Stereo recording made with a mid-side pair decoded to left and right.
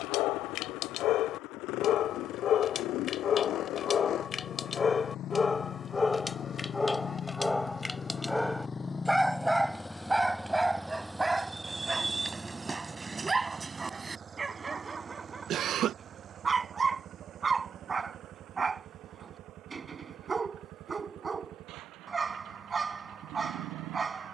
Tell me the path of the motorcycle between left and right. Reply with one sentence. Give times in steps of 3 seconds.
In this clip you hear the motorcycle on the left from 0 s, in the centre from 9 s and on the right from 12 s.